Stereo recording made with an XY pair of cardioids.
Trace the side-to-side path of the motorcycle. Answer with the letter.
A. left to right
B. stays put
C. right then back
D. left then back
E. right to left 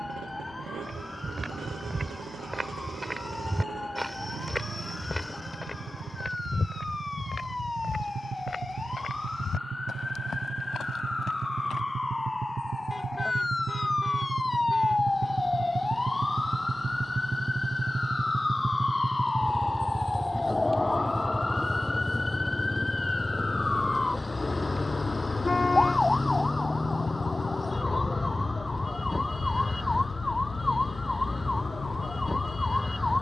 E.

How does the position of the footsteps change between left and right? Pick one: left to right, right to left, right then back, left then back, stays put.
right to left.